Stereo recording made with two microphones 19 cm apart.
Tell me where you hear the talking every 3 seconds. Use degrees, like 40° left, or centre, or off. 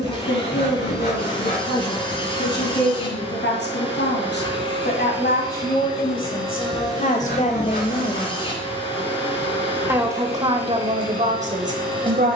70° left, 60° left, 40° left, 30° right.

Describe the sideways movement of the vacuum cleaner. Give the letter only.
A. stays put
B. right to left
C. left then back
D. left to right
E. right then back
A.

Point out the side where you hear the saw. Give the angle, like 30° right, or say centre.
70° left.